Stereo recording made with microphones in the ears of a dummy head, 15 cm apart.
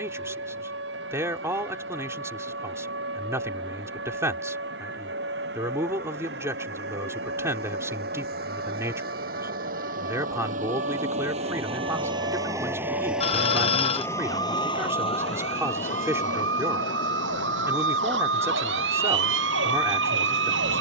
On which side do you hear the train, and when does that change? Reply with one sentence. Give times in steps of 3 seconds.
In this clip you hear the train on the right from 0 s, in the centre from 12 s and on the left from 15 s.